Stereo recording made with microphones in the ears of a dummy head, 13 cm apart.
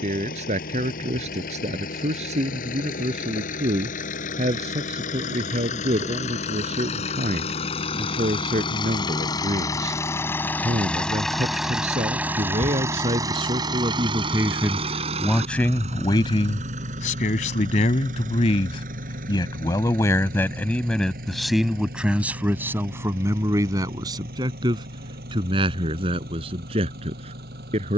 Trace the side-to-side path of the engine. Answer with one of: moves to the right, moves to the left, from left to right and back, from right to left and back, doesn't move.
moves to the right.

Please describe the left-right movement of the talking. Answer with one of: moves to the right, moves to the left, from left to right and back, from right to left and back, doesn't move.
from right to left and back.